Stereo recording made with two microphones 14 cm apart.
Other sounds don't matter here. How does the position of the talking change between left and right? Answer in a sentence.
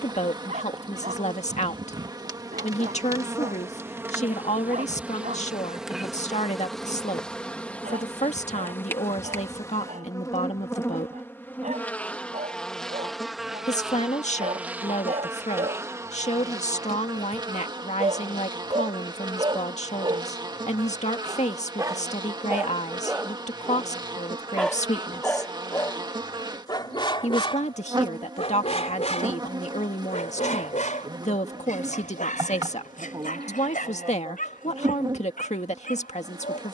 You can hear the talking stay in one place.